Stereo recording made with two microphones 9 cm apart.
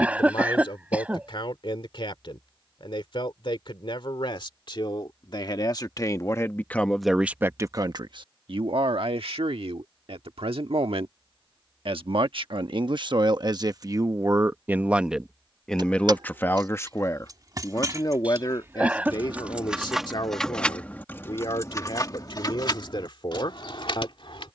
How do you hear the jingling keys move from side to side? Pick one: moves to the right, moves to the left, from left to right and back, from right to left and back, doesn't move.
moves to the left.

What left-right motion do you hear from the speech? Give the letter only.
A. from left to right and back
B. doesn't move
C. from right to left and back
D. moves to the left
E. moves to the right
A.